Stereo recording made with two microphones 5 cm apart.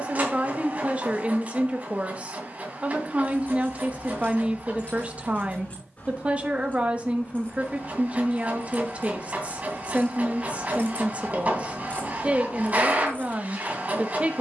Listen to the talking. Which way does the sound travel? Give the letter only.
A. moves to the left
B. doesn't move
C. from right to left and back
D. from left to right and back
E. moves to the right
B.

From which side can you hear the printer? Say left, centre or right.
right.